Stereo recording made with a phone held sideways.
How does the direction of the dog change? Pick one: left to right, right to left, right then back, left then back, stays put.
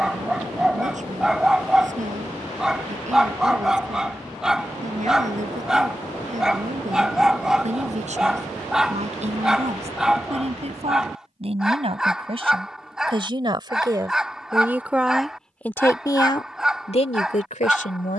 stays put.